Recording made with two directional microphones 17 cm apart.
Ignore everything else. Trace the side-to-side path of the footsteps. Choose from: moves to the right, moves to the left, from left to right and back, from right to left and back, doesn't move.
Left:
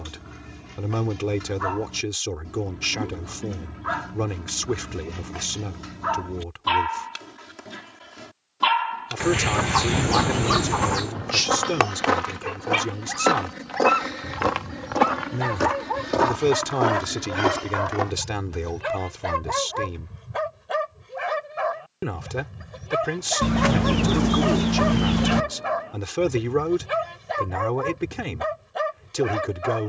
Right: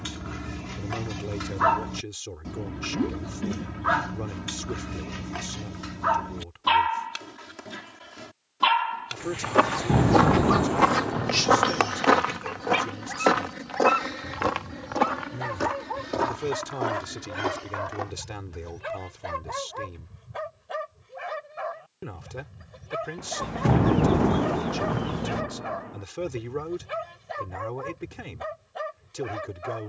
moves to the left.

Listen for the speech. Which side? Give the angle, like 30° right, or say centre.
50° left.